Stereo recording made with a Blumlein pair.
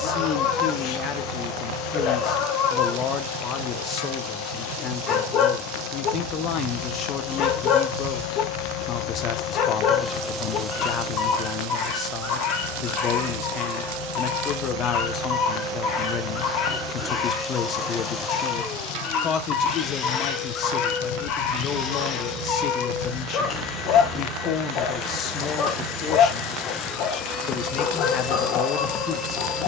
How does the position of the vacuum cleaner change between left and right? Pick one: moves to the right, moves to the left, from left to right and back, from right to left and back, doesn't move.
from left to right and back.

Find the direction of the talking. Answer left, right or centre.
left.